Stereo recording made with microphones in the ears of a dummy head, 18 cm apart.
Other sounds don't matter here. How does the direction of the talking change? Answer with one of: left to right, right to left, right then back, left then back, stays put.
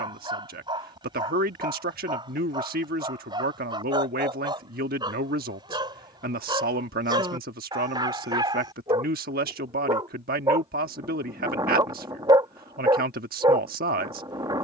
stays put.